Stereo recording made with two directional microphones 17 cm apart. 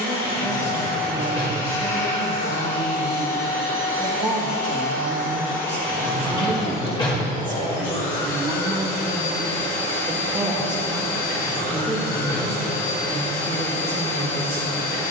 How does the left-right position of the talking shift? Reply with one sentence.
You can hear the talking go right and come back.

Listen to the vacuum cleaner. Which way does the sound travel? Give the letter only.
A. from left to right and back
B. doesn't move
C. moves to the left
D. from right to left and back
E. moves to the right
B.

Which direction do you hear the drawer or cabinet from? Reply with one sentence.
In this clip you hear the drawer or cabinet on the left.